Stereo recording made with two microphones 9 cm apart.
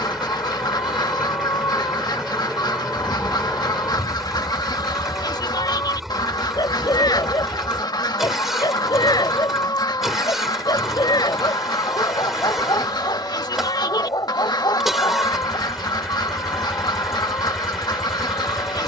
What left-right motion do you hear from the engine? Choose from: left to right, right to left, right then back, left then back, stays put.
stays put.